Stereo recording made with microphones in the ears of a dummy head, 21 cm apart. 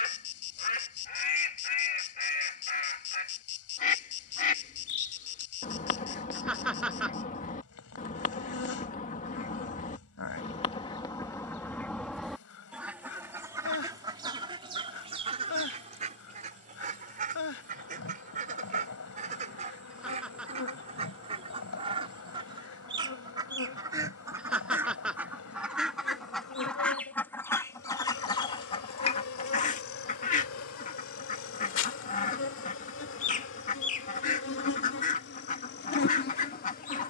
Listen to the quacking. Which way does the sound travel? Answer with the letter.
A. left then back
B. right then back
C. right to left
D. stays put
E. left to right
B.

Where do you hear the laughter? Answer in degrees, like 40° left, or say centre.
centre.